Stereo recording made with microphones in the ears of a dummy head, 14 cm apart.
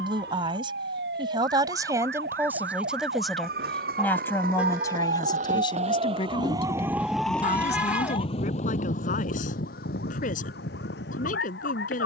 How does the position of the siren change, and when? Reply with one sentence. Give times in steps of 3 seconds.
In this clip you hear the siren on the right from 0 s, in the centre from 6 s and on the left from 9 s.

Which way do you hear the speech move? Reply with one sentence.
In this clip you hear the speech go from the right side to the left.